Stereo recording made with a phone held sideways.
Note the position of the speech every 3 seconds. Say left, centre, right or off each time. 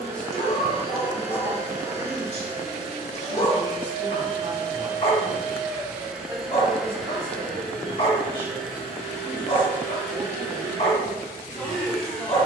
centre, right, right, centre.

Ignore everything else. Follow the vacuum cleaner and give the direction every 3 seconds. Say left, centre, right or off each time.
right, right, centre, centre.